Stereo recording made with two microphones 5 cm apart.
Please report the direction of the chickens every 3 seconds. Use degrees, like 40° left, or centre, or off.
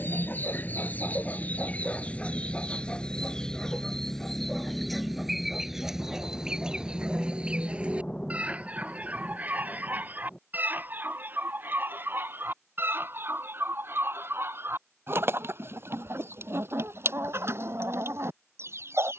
30° left, centre, 20° right, 40° right, 50° right, 60° right, 60° right.